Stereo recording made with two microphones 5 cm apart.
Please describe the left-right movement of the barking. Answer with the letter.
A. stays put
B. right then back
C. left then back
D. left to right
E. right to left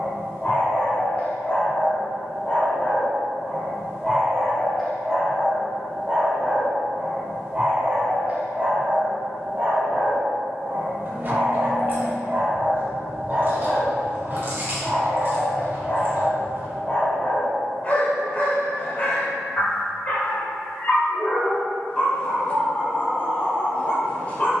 B.